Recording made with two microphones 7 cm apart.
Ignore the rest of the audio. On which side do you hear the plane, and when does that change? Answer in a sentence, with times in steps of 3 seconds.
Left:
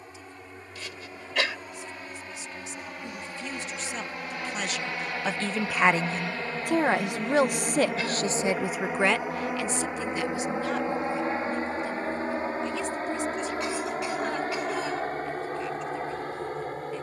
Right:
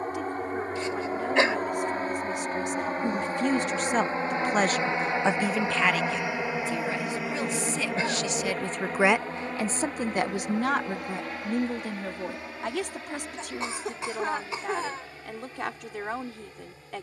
You can hear the plane on the right from 0 s, in the centre from 6 s and on the left from 9 s.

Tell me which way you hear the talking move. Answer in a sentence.
In this clip you hear the talking go left and come back.